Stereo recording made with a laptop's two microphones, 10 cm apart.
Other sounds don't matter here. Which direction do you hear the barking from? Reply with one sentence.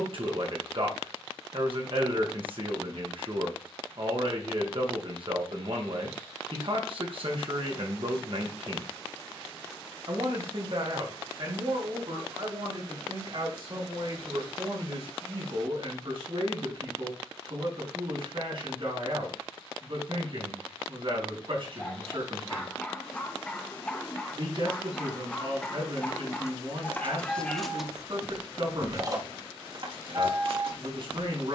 You can hear the barking in the centre.